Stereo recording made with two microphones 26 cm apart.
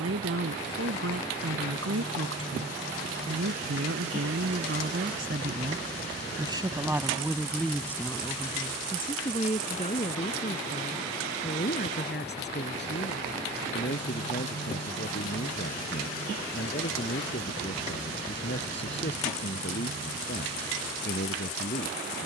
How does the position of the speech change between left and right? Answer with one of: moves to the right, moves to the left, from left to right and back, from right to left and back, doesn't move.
moves to the left.